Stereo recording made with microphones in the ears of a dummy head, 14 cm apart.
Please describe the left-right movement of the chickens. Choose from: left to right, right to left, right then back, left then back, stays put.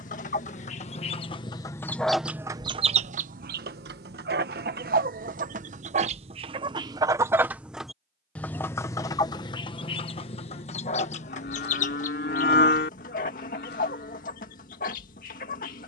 right then back.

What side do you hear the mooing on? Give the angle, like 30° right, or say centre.
60° left.